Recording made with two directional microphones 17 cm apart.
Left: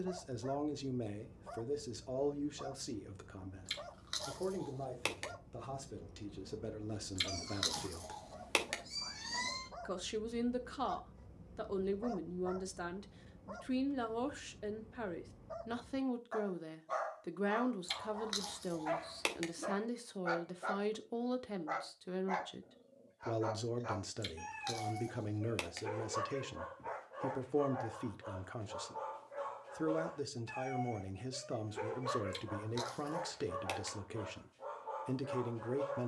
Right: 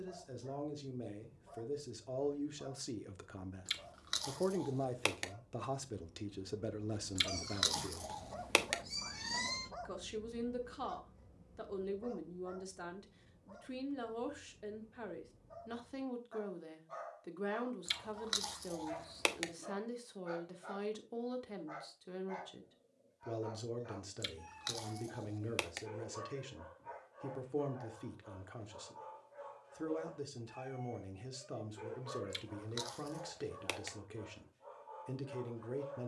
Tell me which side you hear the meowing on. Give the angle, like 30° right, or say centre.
10° right.